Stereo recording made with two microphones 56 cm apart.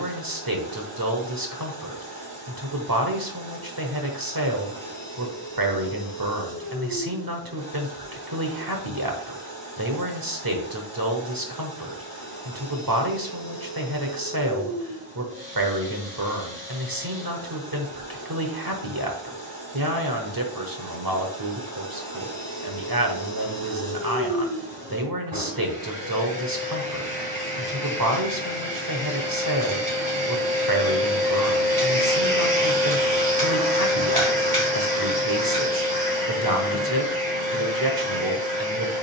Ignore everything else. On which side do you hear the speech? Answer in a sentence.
You can hear the speech on the right.